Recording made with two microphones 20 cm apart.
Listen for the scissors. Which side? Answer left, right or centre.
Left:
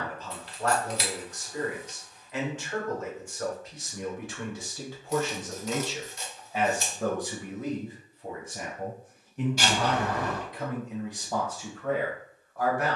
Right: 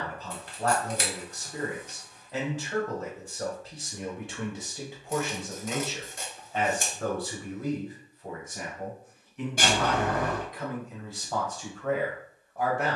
right.